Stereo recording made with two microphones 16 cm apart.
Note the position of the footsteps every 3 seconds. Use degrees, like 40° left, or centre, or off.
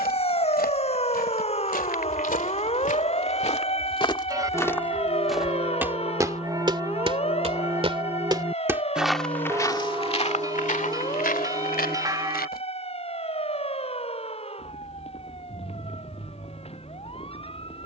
70° left, 20° left, 30° right, 40° left, 70° left, off.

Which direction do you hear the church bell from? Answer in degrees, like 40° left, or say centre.
20° right.